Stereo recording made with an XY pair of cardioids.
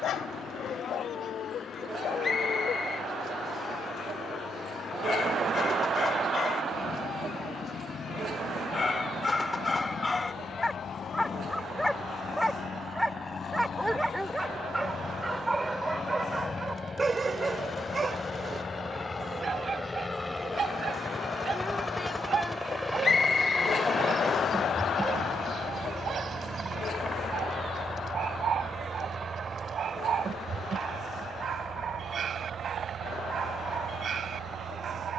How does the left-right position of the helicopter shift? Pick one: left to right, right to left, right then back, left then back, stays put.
left to right.